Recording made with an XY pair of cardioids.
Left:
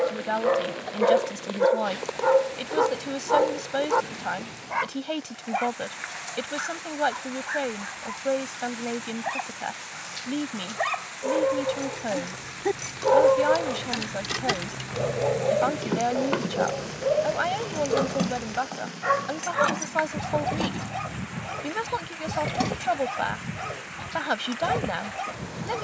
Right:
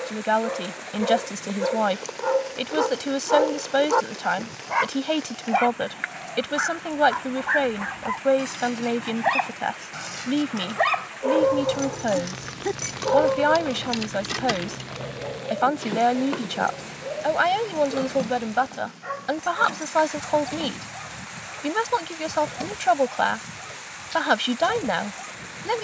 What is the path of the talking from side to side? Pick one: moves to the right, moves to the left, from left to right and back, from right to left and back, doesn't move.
doesn't move.